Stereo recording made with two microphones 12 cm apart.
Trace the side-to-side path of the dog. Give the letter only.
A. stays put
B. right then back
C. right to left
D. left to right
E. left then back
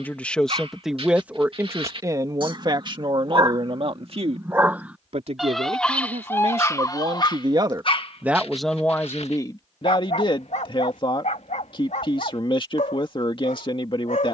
C.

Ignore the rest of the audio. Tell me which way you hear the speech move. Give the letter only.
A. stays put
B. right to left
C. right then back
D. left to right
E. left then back
C.